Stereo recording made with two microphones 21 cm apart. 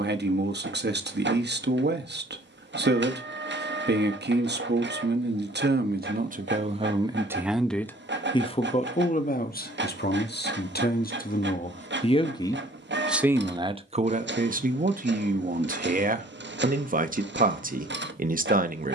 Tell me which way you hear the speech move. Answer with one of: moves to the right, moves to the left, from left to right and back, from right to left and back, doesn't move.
from right to left and back.